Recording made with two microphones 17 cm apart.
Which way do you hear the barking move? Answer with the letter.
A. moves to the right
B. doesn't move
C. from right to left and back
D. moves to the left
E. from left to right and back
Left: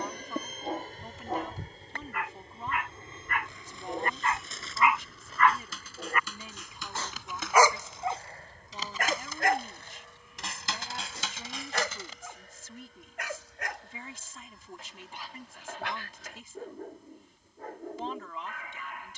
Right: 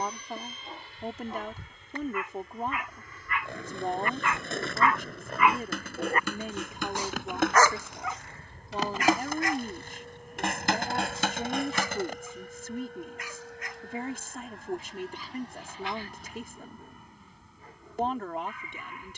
E.